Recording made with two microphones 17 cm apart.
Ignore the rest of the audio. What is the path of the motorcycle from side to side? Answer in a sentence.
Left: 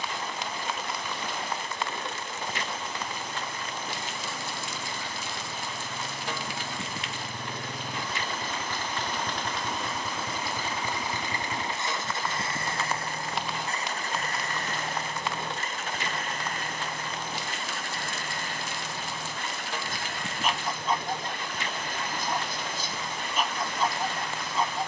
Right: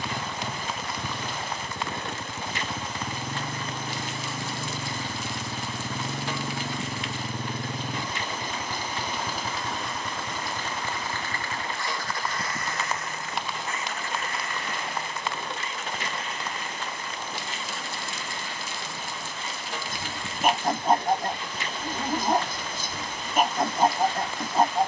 In this clip you hear the motorcycle move from right to left.